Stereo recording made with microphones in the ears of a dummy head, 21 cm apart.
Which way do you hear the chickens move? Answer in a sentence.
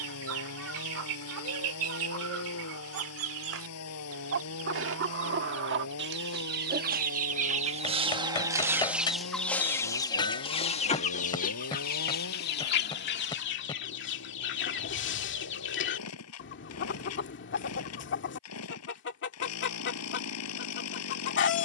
You can hear the chickens go from the right side to the left.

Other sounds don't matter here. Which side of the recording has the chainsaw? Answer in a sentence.
In this clip you hear the chainsaw on the left.